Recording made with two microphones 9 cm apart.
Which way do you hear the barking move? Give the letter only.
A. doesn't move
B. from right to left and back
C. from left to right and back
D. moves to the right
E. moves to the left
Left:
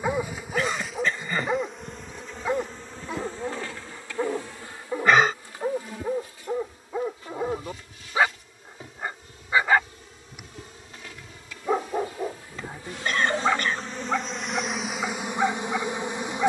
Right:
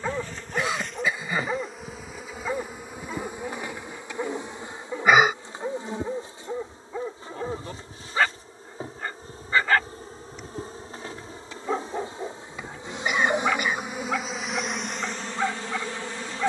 A.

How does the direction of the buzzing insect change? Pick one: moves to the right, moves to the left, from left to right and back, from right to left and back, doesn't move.
from left to right and back.